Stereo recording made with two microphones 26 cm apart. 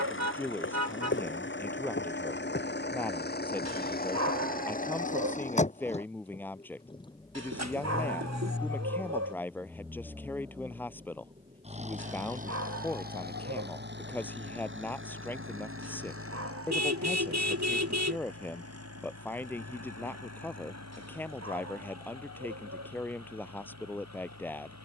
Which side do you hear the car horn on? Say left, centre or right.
right.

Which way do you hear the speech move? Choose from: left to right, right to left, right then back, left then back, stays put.
stays put.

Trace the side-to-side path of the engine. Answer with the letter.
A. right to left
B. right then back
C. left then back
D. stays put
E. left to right
E.